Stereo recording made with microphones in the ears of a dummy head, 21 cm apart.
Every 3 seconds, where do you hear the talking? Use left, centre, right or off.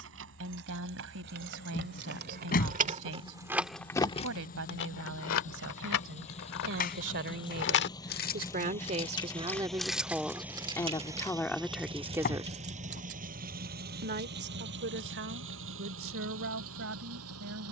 right, right, right, centre, right, right.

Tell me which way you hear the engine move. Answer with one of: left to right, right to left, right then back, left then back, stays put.
left to right.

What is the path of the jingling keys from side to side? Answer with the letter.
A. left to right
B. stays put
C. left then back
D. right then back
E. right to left
C.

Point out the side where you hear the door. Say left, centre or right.
left.